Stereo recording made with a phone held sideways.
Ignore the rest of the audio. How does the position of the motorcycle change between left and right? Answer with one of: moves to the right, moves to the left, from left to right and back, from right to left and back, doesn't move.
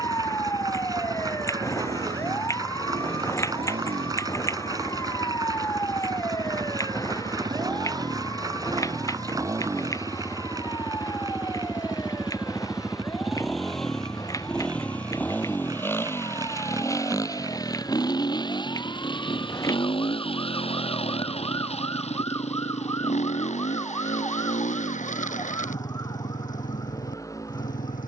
moves to the left.